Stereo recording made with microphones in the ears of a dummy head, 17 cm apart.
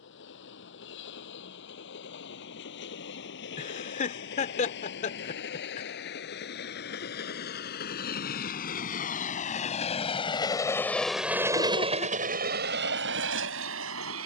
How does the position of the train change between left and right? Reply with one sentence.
You can hear the train move from left to right.